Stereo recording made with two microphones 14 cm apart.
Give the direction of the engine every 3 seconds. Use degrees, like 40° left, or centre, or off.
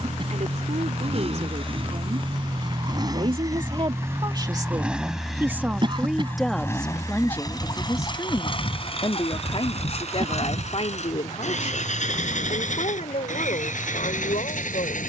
40° right, 10° right, 30° left, 50° left, 70° left.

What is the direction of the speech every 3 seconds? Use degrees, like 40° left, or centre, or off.
60° right, 30° right, 10° left, 50° left, 60° left.